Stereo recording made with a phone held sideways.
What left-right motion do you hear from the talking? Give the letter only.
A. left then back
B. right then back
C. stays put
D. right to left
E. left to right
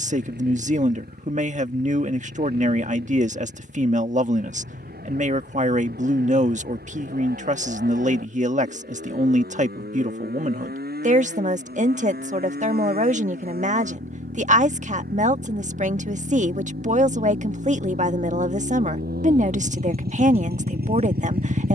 C.